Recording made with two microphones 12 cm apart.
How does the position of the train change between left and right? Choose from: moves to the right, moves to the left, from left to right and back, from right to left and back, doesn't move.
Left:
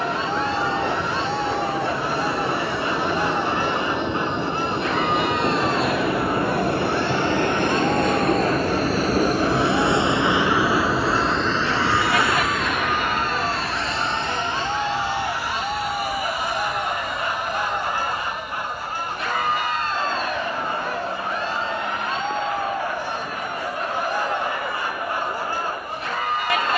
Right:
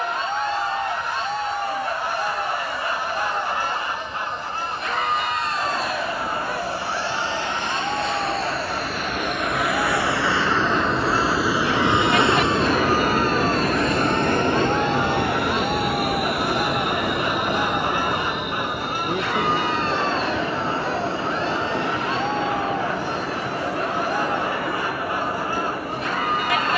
moves to the right.